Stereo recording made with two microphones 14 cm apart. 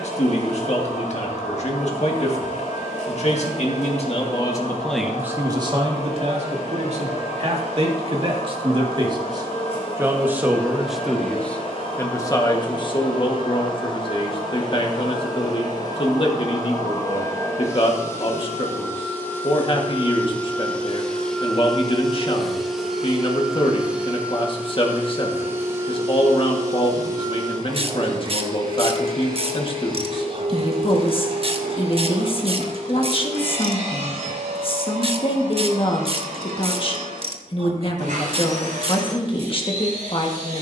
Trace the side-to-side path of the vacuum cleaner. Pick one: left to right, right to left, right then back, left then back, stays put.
left to right.